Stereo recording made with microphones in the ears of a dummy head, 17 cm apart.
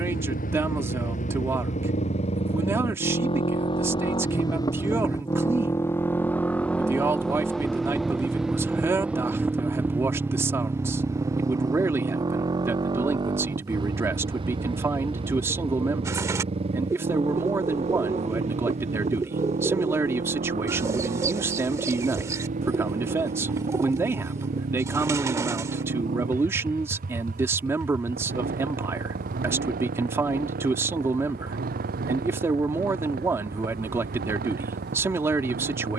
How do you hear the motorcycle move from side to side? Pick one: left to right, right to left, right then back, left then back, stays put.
left to right.